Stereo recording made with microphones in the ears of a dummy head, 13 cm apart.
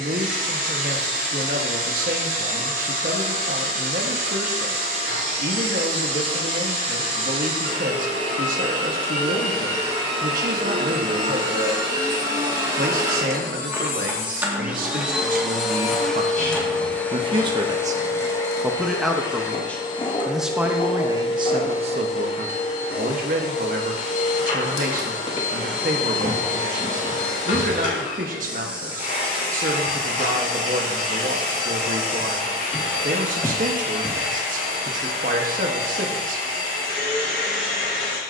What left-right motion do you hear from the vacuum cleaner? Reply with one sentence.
You can hear the vacuum cleaner move from right to left.